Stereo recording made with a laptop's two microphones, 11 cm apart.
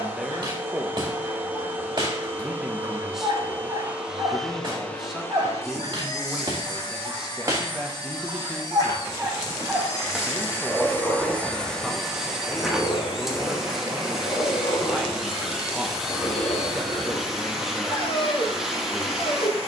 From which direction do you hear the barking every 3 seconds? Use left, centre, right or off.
right, right, right, centre, left, left, left.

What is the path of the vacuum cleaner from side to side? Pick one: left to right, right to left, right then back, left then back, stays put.
left then back.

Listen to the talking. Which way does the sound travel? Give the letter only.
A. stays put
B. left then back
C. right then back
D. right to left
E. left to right
A.